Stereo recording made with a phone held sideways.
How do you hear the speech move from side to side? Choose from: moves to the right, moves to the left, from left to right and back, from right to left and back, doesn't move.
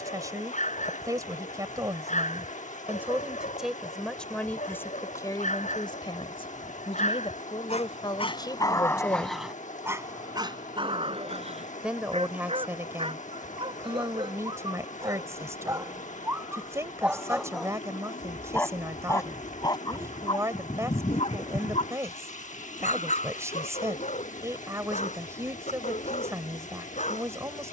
from right to left and back.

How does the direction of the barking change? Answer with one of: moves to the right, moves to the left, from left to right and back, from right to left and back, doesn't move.
from left to right and back.